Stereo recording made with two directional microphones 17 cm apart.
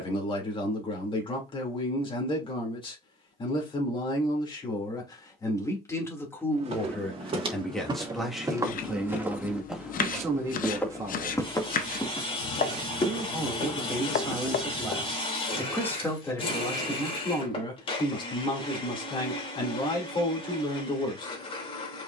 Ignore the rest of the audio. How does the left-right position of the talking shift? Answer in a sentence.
In this clip you hear the talking move from left to right and back again.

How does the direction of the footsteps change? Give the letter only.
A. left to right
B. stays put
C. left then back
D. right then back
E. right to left
E.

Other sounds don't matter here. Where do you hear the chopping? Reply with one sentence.
In this clip you hear the chopping on the left.